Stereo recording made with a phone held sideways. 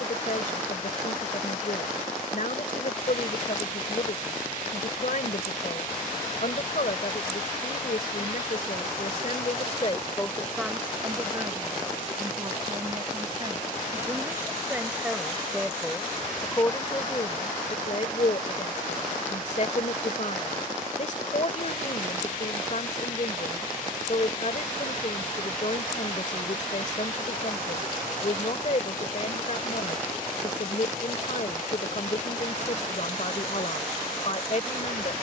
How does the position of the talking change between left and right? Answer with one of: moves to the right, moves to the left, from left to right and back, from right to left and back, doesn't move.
from left to right and back.